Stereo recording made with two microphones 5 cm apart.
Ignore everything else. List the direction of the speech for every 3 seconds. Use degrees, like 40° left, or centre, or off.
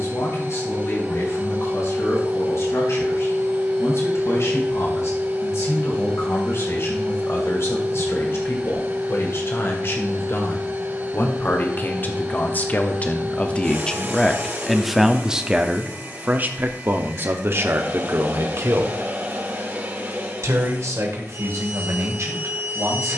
70° left, 70° left, 60° left, 50° left, 20° left, 40° right, 70° right, 80° right.